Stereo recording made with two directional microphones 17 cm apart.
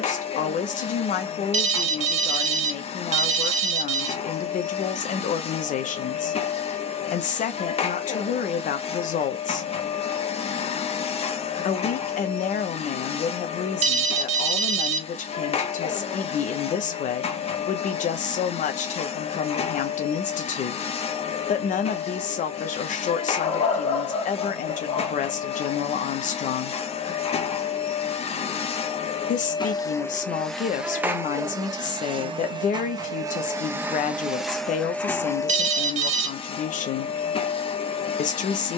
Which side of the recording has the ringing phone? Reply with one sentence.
You can hear the ringing phone on the right.